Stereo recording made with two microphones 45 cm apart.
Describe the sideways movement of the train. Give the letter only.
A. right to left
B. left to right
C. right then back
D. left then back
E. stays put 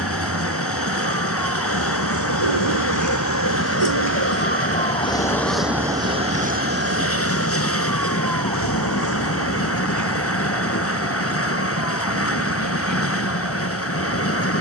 E.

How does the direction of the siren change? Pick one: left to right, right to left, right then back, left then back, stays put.
left to right.